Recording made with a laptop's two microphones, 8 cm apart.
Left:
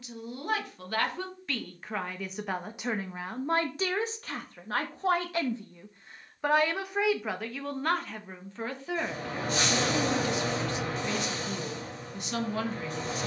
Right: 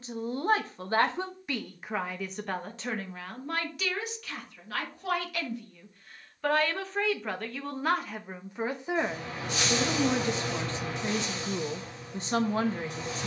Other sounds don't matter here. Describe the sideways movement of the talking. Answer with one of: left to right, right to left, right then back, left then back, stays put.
left then back.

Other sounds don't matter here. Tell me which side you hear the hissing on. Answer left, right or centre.
left.